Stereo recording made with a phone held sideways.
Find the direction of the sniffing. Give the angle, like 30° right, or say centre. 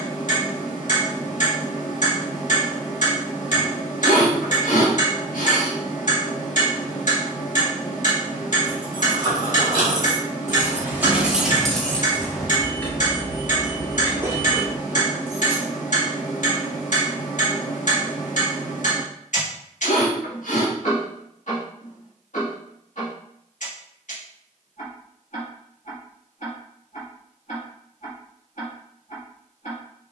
80° left.